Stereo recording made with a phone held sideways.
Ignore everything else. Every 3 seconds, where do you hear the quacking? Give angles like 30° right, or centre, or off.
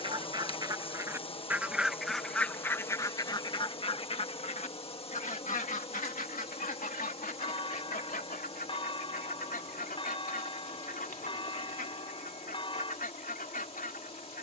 10° right, 50° left, 70° left, 80° left, 80° left.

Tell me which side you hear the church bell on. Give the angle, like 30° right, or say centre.
40° left.